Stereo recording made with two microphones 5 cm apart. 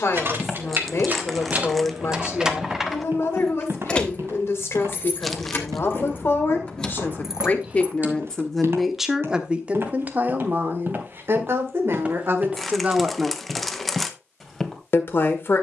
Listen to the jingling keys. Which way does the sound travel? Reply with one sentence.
In this clip you hear the jingling keys move from right to left and back again.